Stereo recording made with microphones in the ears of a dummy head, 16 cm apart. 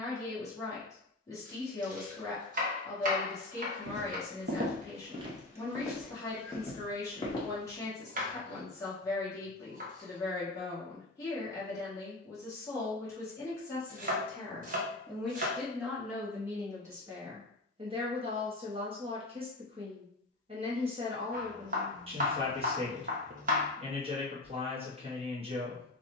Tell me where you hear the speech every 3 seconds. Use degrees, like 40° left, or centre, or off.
20° left, 20° left, 20° left, 20° left, 20° left, 10° right, 30° right, 30° right, 30° right.